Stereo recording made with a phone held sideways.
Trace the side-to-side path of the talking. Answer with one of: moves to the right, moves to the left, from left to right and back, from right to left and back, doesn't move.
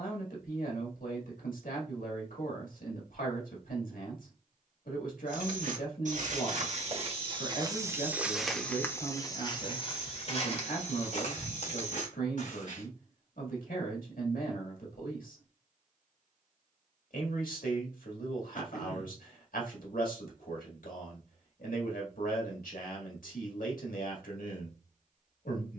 doesn't move.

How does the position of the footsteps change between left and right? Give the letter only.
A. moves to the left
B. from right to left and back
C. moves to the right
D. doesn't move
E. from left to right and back
A.